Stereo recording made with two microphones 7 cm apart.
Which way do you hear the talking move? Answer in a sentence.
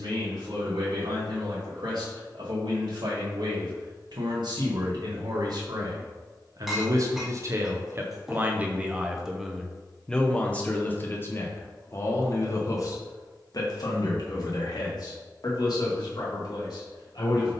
In this clip you hear the talking move to the left.